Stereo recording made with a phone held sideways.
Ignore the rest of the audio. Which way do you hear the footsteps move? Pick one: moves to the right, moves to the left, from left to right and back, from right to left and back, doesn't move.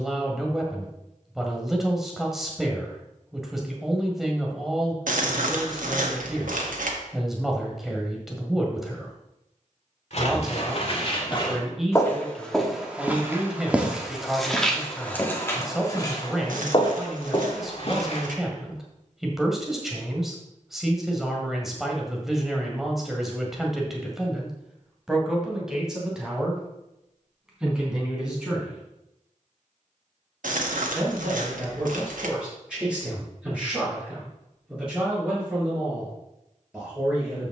from left to right and back.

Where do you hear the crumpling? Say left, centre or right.
right.